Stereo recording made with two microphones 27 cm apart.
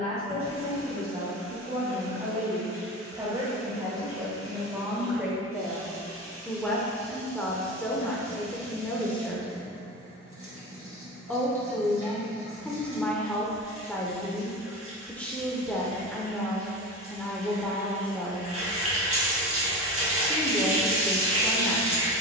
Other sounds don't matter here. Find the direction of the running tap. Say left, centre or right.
right.